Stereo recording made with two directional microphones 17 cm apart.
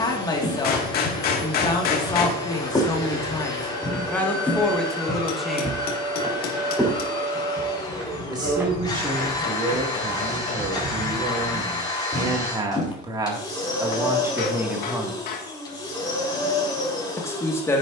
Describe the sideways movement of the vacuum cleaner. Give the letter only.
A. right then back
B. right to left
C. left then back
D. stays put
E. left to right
D.